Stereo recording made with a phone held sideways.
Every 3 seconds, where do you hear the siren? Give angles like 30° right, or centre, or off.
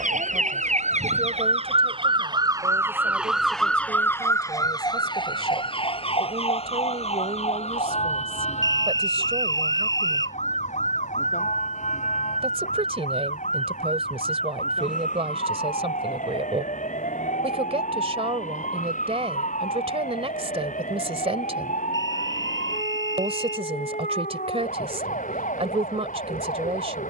50° right, 20° left, 50° left, 60° left, 70° left, 70° left, 70° left, 70° left, 70° left.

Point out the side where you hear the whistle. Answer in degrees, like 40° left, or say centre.
30° left.